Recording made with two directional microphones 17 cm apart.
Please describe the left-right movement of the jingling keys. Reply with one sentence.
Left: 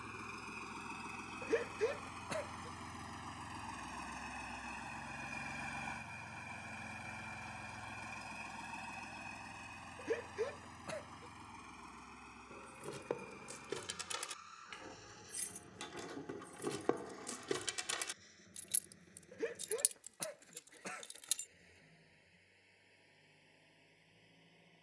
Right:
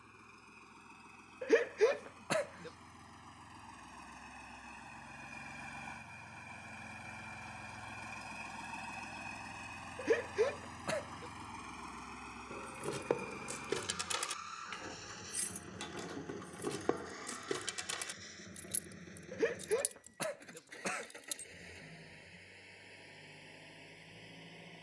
You can hear the jingling keys move to the left.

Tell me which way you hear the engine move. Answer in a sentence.
In this clip you hear the engine move to the right.